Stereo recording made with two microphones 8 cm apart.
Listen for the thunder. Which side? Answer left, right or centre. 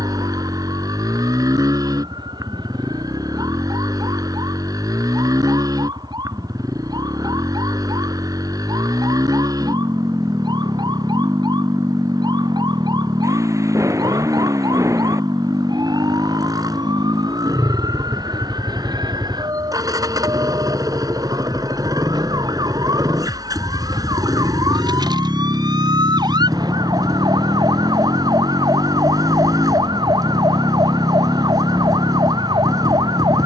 right.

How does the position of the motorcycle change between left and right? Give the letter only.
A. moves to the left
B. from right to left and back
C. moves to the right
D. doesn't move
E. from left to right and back
D.